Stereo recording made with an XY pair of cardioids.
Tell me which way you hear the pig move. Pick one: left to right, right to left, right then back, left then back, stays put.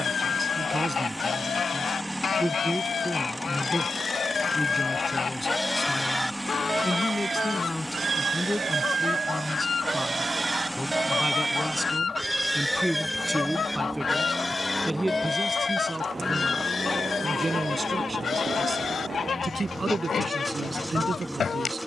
right then back.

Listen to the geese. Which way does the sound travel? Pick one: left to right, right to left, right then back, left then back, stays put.
stays put.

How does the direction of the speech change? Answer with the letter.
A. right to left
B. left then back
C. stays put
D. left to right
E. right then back
B.